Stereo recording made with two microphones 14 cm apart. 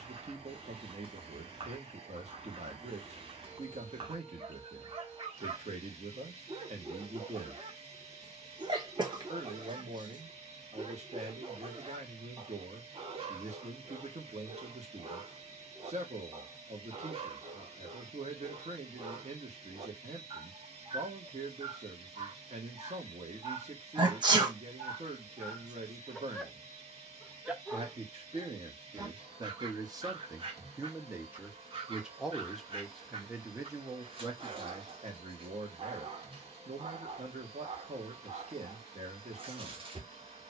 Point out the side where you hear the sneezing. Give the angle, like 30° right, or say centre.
30° right.